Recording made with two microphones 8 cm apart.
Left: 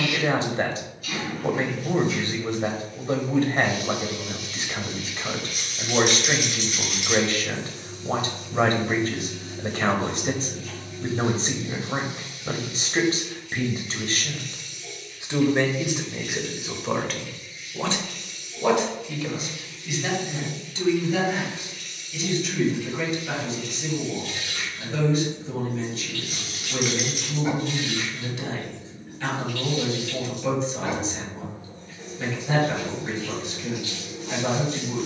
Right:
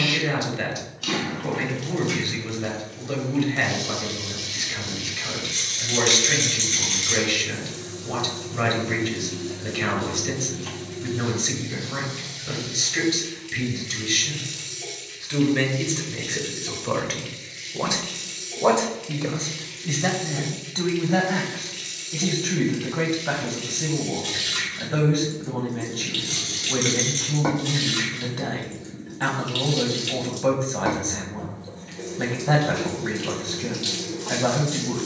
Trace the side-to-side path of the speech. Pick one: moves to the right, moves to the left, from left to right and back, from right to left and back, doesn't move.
moves to the right.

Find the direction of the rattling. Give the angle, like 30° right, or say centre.
10° left.